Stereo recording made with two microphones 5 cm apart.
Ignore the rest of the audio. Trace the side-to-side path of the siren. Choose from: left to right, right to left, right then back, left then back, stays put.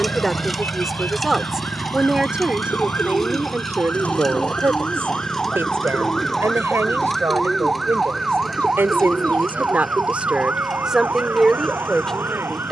left to right.